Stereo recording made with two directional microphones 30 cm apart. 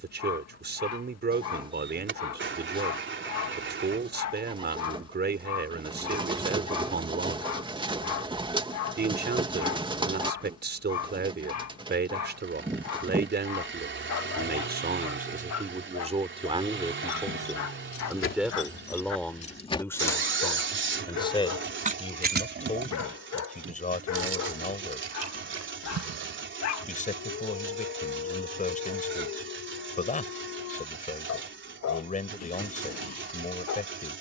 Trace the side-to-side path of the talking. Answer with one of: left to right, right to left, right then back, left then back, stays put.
right to left.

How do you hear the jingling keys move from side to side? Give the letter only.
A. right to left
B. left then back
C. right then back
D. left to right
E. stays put
D.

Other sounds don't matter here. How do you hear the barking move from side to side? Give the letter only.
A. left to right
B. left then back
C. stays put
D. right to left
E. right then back
C.